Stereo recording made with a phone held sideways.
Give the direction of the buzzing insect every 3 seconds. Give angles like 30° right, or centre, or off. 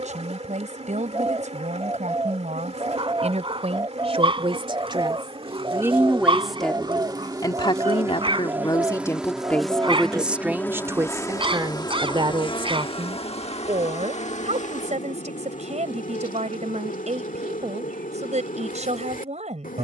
50° right, 40° right, 20° right, 10° left, 40° left, 60° left, 60° left.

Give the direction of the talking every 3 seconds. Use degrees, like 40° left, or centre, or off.
50° right, 40° right, 20° left, 10° right, 40° right, 50° right, 50° right.